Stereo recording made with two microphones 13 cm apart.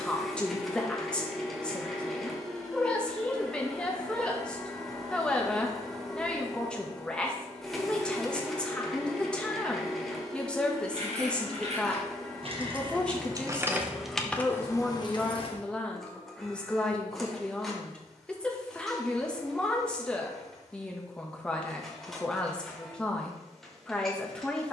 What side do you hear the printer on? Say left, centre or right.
centre.